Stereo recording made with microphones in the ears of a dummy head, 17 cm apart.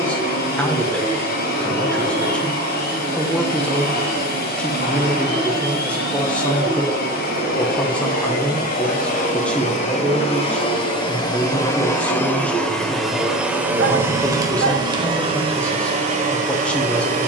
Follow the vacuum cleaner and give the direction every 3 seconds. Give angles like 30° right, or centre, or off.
50° left, 50° left, 50° left, 30° left, 10° right, 30° right.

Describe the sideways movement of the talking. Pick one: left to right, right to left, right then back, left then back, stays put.
stays put.